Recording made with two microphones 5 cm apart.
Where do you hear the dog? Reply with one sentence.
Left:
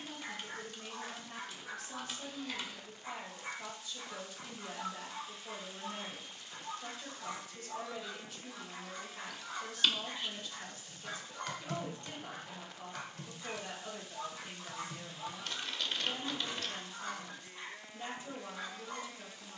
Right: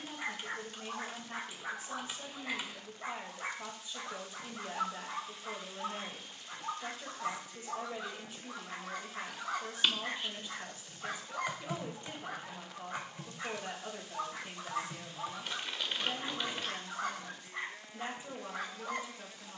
In this clip you hear the dog on the right.